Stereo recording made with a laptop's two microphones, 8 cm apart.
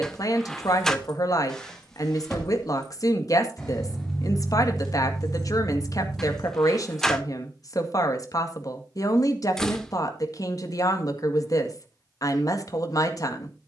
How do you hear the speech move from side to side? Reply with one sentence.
You can hear the speech stay in one place.